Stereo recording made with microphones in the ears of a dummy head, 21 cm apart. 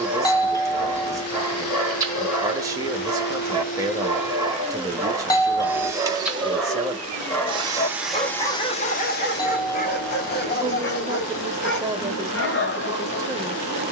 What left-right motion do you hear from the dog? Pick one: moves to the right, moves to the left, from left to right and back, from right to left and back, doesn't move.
moves to the left.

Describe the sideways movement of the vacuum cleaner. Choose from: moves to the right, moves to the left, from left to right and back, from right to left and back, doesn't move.
from left to right and back.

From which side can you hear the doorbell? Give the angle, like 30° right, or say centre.
20° left.